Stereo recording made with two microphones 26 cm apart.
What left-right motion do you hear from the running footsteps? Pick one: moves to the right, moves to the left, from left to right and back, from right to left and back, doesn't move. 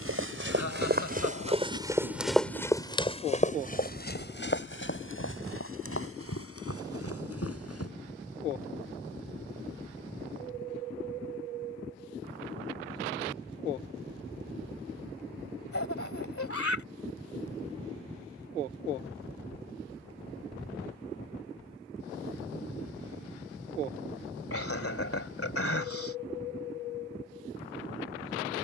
moves to the left.